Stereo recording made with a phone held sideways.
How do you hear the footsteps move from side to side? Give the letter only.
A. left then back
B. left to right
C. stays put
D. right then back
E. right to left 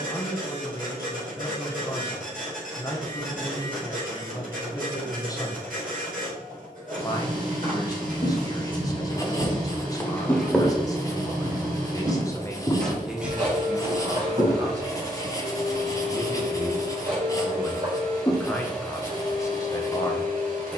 B.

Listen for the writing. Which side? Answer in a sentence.
You can hear the writing on the left.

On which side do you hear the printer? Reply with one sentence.
You can hear the printer on the right.